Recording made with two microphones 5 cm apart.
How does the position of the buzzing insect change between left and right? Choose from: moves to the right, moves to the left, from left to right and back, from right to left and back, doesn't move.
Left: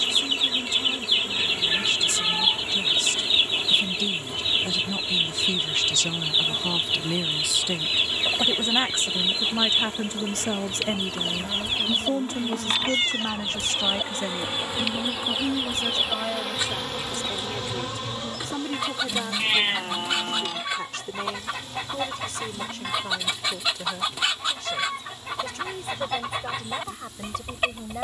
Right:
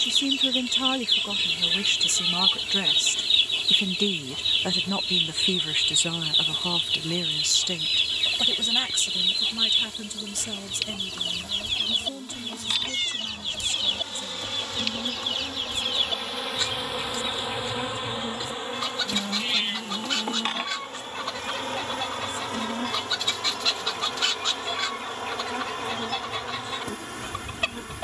moves to the right.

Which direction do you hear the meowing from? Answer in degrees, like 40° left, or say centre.
40° left.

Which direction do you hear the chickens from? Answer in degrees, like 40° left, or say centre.
20° left.